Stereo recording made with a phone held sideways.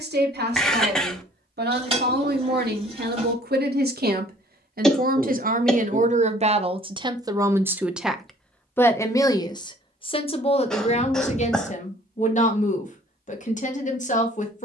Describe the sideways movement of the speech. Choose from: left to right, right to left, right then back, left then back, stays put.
right to left.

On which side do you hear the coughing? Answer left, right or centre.
centre.